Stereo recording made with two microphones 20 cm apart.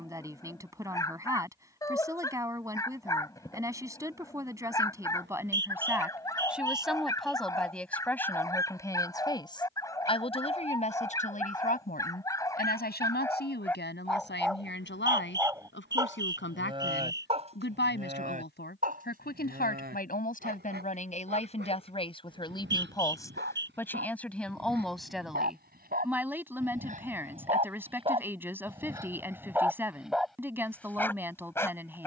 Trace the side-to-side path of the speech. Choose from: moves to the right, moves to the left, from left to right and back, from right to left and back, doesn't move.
from right to left and back.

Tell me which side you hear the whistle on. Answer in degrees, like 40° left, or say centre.
60° right.